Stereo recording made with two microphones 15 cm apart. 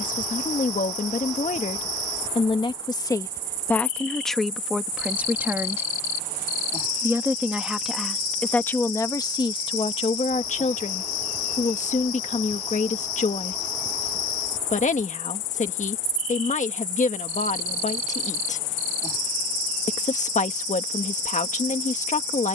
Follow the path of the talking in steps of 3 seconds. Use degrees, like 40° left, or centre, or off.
50° left, centre, centre, 40° left, 50° left, 50° left, 50° left, 50° left.